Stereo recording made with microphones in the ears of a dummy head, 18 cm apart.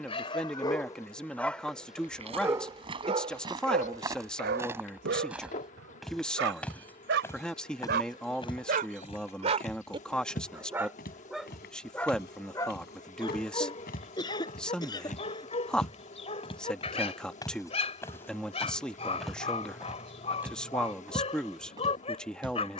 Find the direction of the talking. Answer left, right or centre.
centre.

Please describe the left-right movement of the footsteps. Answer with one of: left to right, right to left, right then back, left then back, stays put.
left then back.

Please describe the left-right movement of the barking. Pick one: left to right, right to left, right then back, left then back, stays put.
right then back.